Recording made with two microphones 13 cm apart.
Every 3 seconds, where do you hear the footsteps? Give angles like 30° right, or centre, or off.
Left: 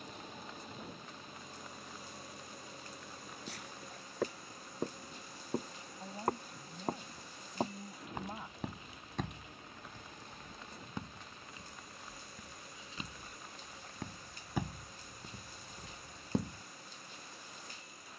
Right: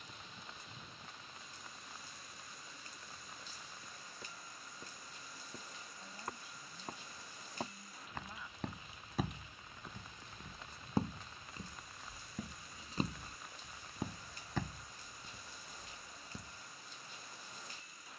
off, 70° left, 20° left, 30° right, 20° right, 60° left.